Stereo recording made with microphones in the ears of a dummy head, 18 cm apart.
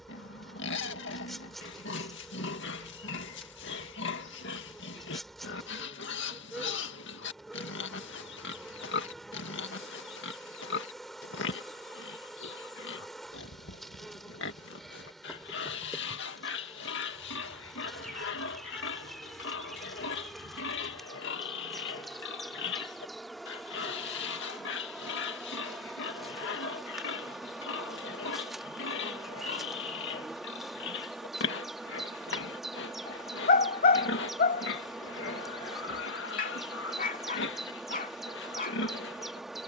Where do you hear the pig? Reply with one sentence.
You can hear the pig on the left.